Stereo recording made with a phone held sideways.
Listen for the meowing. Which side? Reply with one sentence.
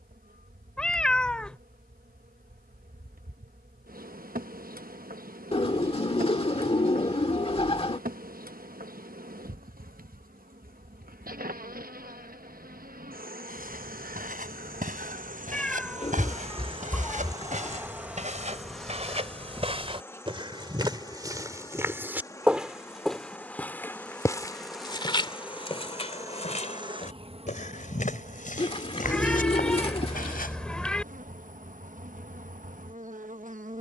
You can hear the meowing in the centre.